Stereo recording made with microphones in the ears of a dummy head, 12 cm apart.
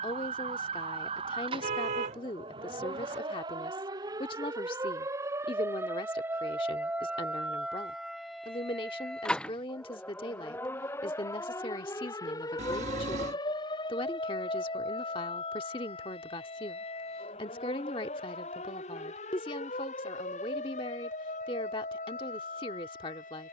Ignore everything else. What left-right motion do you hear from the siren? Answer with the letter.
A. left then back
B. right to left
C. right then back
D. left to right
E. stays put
B.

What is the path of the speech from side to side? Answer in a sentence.
In this clip you hear the speech stay put.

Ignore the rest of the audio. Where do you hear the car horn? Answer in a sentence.
You can hear the car horn on the right.